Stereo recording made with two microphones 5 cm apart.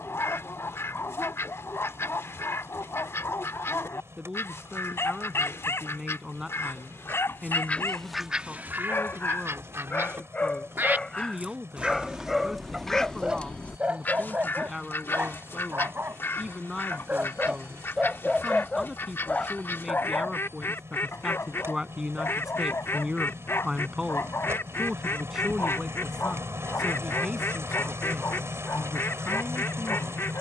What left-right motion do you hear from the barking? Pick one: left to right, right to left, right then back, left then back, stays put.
right then back.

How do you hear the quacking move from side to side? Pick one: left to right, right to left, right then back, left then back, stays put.
right then back.